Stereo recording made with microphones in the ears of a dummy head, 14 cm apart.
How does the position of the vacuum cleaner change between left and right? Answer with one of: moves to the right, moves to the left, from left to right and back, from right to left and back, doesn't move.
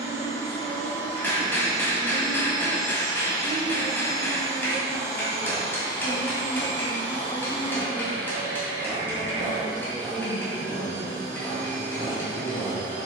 doesn't move.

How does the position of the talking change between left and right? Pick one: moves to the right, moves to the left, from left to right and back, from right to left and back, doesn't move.
moves to the left.